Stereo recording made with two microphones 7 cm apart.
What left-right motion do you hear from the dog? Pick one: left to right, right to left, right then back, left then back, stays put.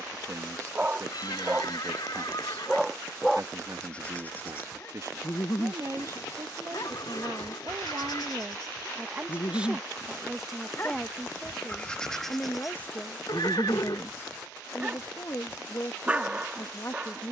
left then back.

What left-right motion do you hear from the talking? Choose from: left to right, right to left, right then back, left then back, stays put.
right to left.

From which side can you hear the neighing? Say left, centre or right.
left.